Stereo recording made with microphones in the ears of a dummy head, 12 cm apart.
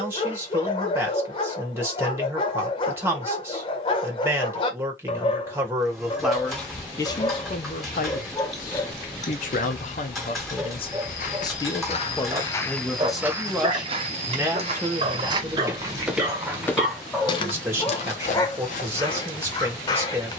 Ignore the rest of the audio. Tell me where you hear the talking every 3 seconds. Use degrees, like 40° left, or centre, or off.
20° right, 20° right, 40° left, 50° left, centre, 20° right, 20° right.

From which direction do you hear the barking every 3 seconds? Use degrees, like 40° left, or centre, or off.
30° left, 30° left, 20° left, 10° right, 30° right, 10° right, 30° left.